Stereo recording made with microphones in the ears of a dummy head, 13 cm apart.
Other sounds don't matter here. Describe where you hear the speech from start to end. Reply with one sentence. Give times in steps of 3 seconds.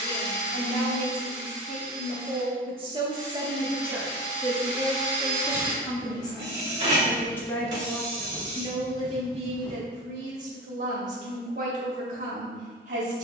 In this clip you hear the speech on the right from 0 s, in the centre from 3 s and on the right from 9 s.